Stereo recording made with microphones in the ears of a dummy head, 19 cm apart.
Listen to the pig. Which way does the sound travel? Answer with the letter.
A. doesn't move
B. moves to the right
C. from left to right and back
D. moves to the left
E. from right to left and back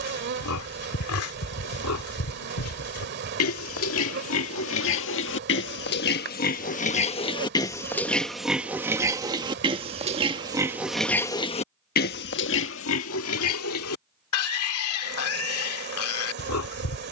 C.